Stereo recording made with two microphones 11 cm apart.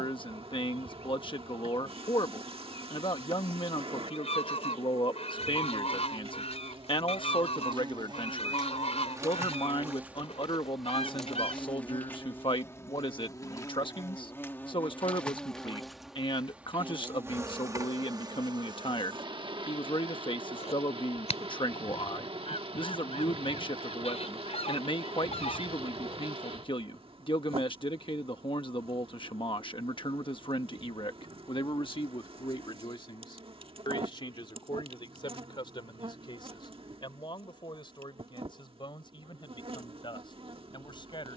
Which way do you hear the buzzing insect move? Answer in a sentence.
In this clip you hear the buzzing insect go left and come back.